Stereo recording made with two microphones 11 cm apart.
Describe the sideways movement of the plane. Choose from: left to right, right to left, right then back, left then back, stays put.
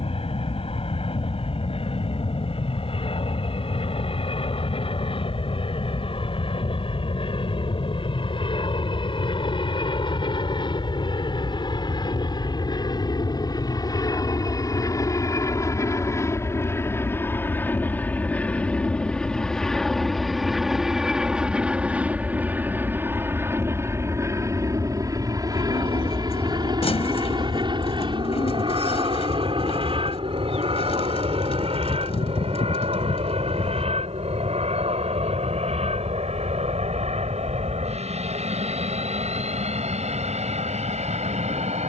left to right.